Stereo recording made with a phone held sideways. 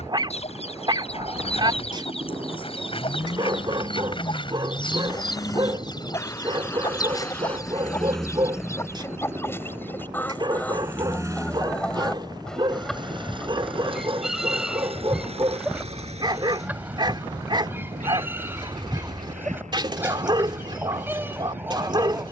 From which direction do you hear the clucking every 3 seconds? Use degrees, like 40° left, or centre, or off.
50° left, 40° left, 30° left, 10° left, centre, 10° right, 10° right, 10° right.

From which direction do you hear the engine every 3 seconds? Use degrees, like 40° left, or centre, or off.
40° left, 30° left, 10° left, 20° right, 40° right, 50° right, 60° right, 60° right.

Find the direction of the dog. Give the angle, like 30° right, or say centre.
30° right.